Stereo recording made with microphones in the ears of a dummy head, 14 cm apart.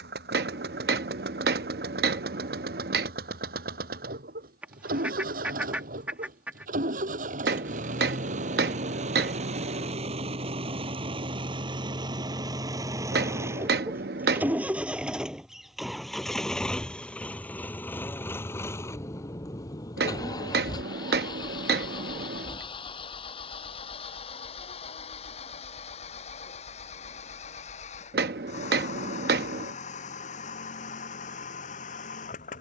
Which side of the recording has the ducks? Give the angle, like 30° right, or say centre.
10° right.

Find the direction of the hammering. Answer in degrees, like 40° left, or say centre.
70° right.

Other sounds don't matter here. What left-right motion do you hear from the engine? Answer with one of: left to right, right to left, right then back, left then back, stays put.
right to left.